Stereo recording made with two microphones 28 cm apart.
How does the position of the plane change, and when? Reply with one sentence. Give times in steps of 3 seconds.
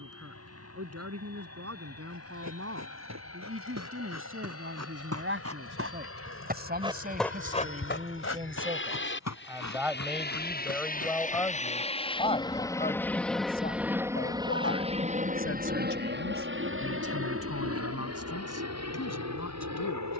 You can hear the plane on the left from 0 s, in the centre from 12 s and on the right from 15 s.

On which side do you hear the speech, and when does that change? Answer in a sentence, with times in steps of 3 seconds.
You can hear the speech on the right from 0 s, in the centre from 9 s and on the left from 12 s.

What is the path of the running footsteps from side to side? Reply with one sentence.
In this clip you hear the running footsteps move to the left.